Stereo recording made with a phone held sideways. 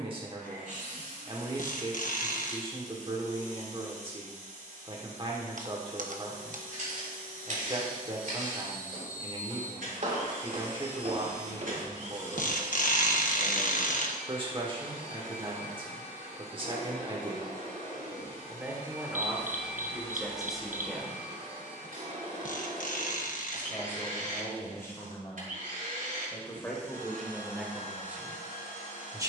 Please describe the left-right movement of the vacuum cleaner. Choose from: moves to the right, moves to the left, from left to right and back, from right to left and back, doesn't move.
doesn't move.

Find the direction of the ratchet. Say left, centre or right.
left.